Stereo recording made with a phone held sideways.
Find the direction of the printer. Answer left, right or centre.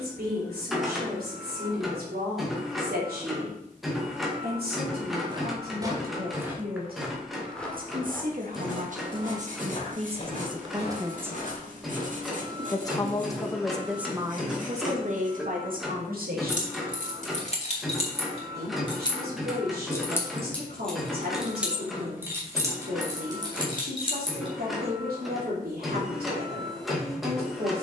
centre.